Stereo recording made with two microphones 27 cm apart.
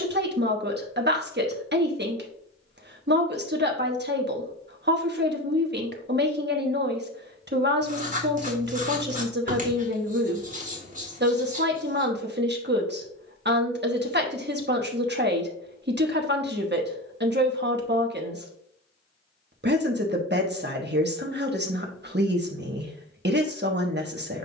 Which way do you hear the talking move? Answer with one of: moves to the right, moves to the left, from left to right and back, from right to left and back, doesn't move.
doesn't move.